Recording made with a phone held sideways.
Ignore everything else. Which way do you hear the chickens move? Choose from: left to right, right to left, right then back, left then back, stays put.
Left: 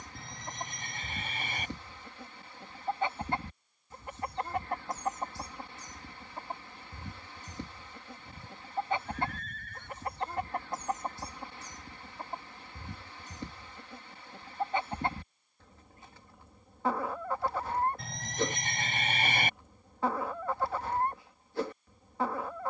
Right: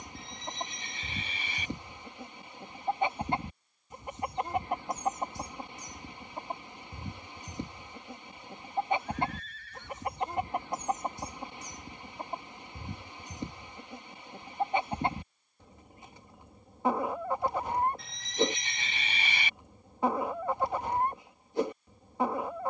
stays put.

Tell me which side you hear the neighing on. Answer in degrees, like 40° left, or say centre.
60° left.